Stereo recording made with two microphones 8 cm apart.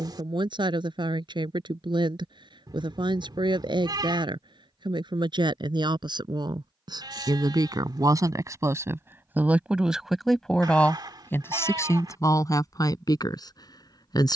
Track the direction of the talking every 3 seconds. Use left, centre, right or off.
right, right, right, centre, left.